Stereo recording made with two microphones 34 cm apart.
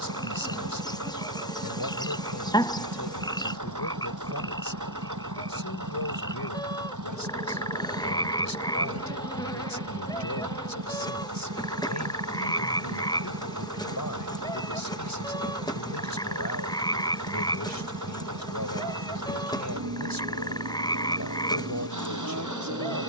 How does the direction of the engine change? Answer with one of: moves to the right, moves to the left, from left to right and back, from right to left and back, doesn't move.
doesn't move.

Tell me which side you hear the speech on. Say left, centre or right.
left.